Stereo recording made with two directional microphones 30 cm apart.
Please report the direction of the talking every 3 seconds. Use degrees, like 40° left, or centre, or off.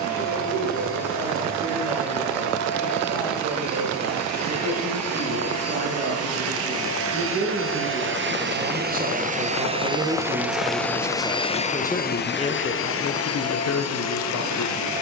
50° right, 50° right, 40° right, 10° right, 40° left.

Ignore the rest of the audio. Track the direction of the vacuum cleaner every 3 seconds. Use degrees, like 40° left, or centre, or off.
60° right, 60° right, 40° right, centre, 50° left.